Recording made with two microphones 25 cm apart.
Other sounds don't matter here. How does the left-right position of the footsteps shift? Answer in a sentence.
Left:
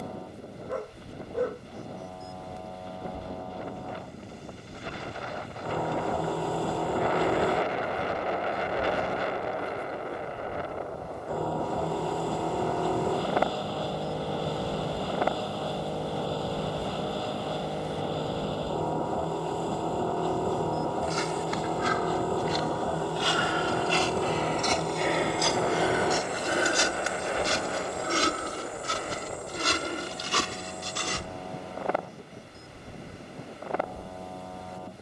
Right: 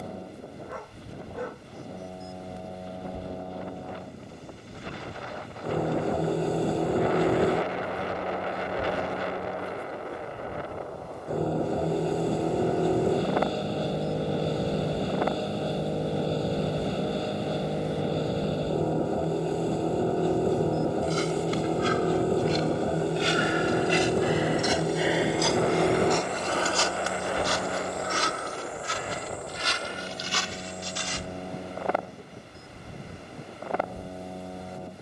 In this clip you hear the footsteps travel towards the left.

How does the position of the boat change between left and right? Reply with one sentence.
In this clip you hear the boat stay in one place.